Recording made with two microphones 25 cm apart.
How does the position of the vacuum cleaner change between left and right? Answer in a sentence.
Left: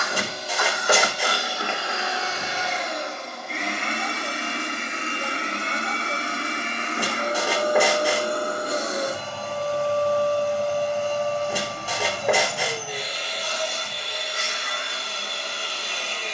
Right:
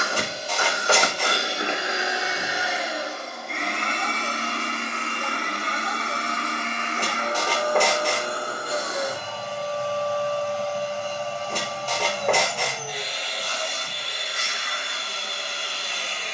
In this clip you hear the vacuum cleaner travel towards the left.